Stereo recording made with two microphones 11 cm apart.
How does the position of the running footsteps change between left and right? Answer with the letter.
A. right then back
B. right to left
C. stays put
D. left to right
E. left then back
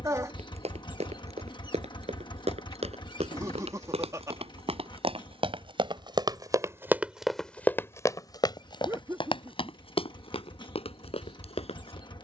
B.